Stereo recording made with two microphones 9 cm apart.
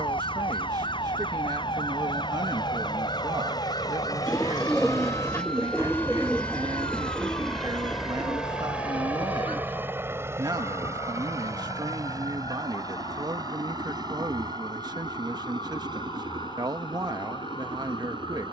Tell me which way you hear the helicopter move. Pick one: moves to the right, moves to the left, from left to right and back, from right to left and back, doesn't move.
moves to the right.